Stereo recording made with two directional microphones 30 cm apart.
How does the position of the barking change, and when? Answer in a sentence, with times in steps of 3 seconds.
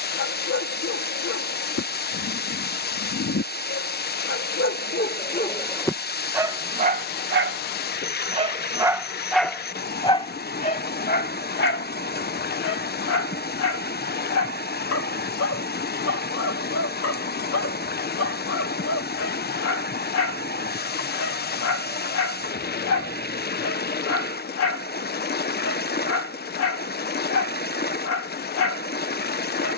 In this clip you hear the barking on the left from 0 s, on the right from 6 s and on the left from 9 s.